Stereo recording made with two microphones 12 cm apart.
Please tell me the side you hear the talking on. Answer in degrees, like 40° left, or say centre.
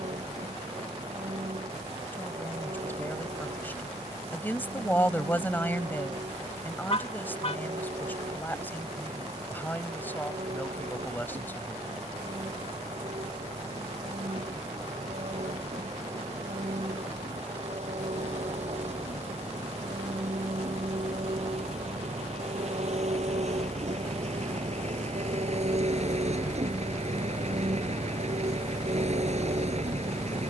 20° left.